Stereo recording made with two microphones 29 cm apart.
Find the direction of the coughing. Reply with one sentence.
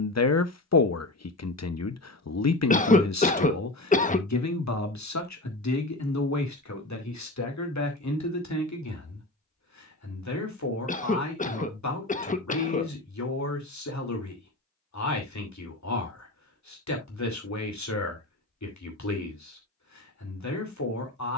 In this clip you hear the coughing on the left.